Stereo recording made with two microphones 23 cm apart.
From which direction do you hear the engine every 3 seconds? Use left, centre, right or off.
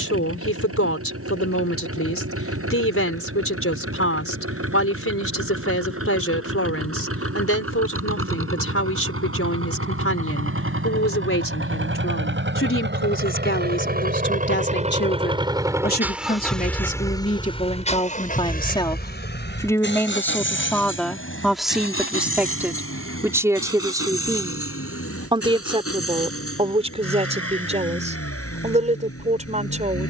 right, right, right, right, right, centre, left, left, left, left.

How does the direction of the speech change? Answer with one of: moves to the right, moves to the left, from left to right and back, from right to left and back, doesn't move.
moves to the right.